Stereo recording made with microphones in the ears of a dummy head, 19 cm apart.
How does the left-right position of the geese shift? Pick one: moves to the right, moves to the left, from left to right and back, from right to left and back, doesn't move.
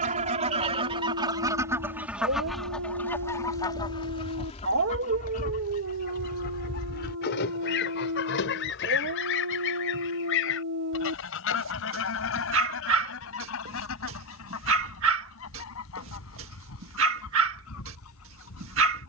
moves to the left.